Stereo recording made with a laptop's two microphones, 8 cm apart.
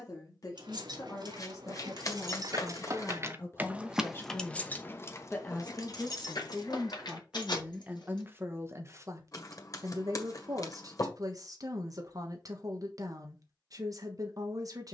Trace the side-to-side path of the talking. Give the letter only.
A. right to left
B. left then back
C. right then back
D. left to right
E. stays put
D.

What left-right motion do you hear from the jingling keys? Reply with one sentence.
In this clip you hear the jingling keys travel towards the left.